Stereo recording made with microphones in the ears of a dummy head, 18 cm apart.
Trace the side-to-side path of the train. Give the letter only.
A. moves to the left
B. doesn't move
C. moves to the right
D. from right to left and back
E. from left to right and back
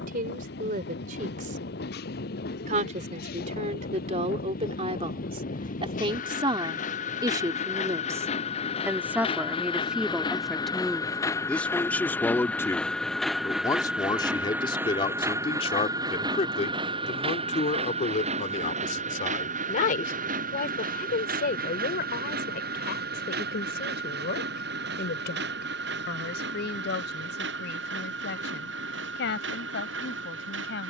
C.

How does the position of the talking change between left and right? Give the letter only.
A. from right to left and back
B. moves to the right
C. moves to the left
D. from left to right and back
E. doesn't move
C.